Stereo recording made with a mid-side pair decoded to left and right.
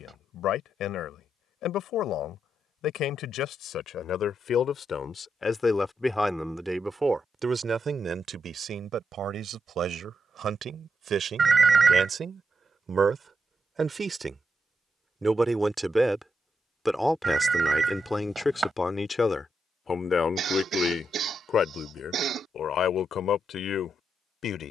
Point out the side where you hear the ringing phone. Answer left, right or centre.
right.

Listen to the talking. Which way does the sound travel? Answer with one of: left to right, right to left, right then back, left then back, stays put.
right then back.